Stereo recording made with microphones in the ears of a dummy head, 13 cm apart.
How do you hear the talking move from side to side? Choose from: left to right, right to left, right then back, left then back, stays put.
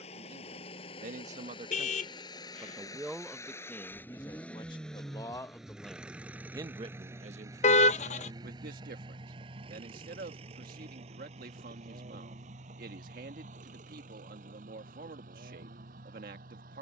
left then back.